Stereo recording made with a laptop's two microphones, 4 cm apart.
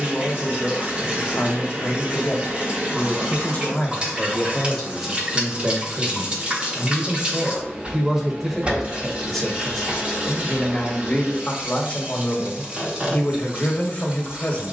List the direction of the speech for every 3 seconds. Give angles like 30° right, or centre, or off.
40° left, 10° left, 20° right, 20° left, 30° left.